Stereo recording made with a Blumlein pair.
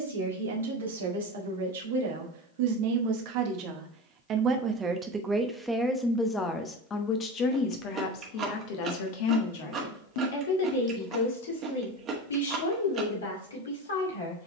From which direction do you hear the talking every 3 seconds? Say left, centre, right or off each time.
right, right, left, left, left.